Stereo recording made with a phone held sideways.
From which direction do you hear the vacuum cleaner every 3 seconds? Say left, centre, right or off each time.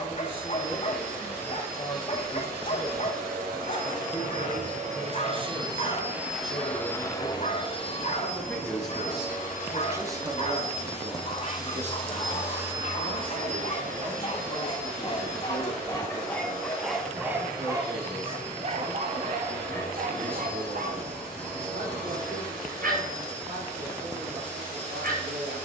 right, right, left, left, right, right, right, right, right.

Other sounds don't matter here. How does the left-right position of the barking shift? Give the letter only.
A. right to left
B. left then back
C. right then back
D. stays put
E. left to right
E.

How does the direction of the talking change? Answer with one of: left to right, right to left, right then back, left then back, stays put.
left to right.